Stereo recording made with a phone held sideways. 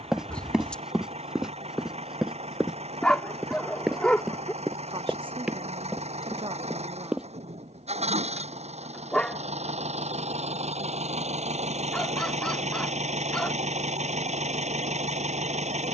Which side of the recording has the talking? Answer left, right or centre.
right.